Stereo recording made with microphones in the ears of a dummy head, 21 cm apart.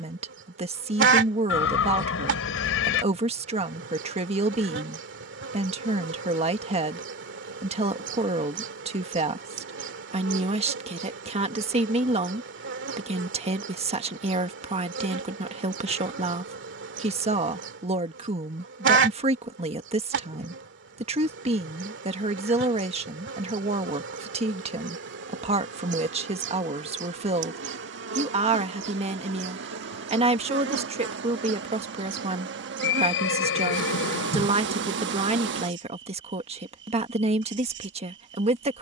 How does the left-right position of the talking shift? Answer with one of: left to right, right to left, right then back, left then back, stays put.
stays put.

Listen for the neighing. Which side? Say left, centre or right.
left.